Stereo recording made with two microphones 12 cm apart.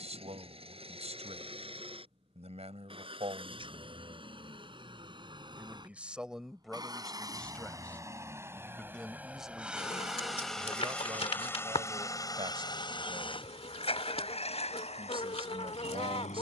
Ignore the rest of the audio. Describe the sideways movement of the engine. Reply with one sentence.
In this clip you hear the engine move from right to left.